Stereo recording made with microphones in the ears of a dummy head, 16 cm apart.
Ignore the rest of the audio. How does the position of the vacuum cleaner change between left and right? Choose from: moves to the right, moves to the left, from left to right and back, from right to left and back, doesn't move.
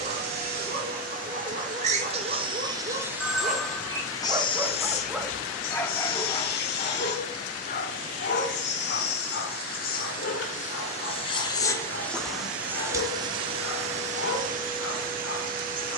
from right to left and back.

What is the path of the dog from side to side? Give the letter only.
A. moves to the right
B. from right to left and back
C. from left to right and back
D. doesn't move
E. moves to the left
E.